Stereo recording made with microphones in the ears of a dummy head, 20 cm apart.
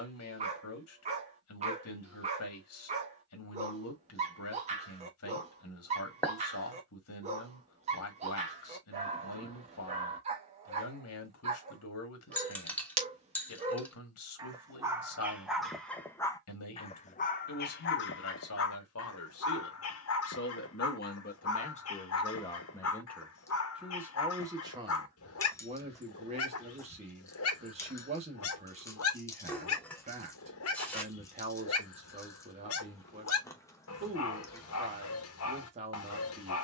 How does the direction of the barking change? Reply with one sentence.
In this clip you hear the barking travel towards the left.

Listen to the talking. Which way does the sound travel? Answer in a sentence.
You can hear the talking go from the left side to the right.